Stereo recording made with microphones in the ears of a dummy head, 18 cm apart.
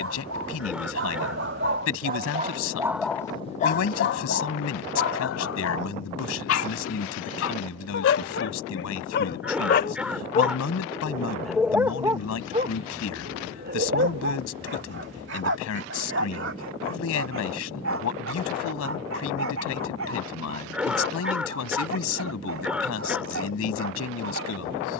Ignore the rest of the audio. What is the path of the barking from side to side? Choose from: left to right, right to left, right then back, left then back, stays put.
left then back.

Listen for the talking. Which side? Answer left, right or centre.
left.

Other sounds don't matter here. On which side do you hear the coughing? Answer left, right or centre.
centre.